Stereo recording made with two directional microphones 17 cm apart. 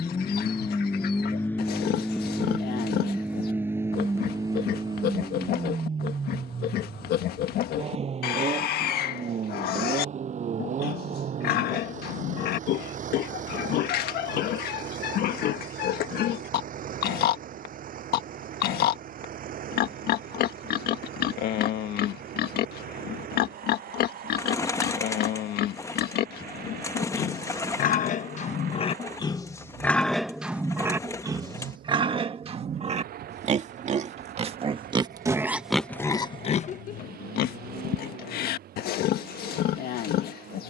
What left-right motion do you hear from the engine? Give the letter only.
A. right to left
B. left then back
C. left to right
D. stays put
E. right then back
C.